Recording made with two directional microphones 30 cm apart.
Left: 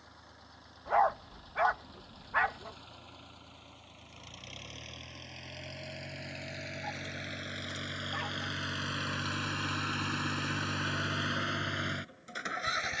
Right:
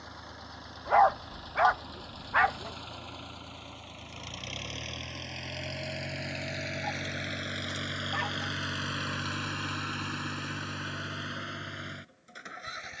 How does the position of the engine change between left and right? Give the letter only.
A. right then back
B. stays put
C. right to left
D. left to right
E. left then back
C.